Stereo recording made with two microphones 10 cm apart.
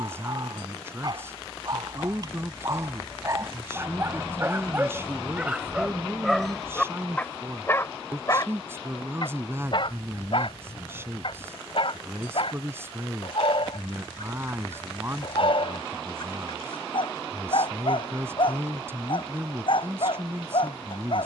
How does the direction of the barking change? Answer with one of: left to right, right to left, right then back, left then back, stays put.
right to left.